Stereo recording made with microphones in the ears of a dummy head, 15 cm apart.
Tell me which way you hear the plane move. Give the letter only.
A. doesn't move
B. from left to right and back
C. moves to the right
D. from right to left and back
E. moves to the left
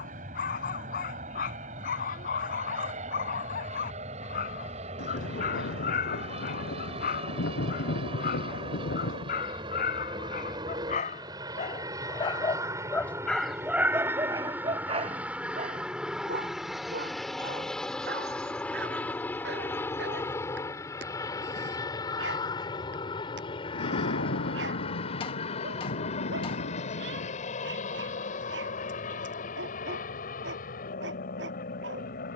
E.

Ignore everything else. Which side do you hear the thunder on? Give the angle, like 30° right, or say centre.
80° left.